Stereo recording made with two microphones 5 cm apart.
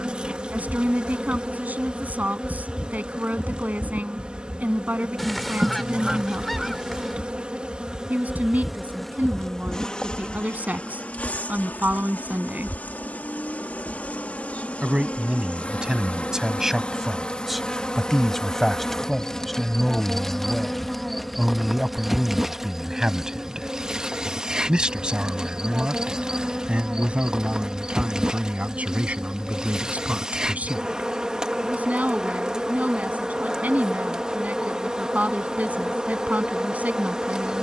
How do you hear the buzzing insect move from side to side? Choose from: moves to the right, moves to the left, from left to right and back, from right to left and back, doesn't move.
from right to left and back.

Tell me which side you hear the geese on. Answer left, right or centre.
centre.